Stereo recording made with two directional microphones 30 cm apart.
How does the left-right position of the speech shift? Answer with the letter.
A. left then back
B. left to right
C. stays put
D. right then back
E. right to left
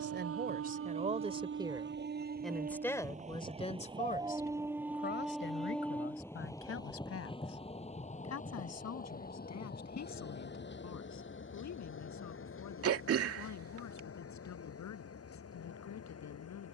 E.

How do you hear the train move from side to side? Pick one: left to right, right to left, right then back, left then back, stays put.
right to left.